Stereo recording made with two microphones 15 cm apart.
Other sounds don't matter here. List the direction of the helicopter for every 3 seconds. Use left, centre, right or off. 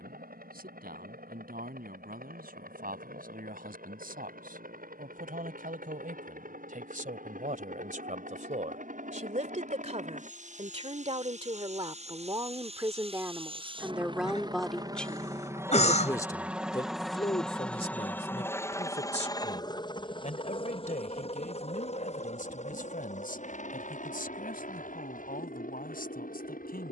right, right, right, right, right, centre, left, left, left.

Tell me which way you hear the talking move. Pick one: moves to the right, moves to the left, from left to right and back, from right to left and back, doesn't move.
moves to the left.